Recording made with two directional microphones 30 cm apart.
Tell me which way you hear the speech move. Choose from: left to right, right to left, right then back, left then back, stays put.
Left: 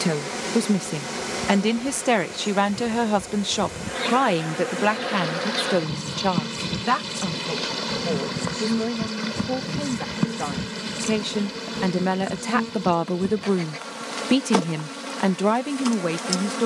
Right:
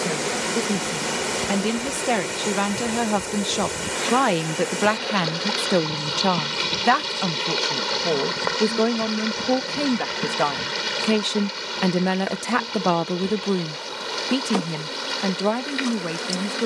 right then back.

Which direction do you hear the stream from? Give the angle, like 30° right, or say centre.
70° right.